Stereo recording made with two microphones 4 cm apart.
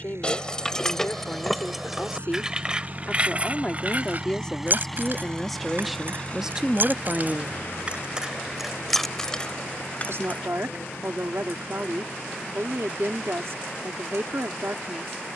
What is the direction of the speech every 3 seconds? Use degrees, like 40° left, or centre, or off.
40° left, 10° left, 20° right, 70° right, 70° right.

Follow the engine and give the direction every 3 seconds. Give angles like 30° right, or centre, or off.
60° right, 10° right, 40° left, 60° left, 70° left.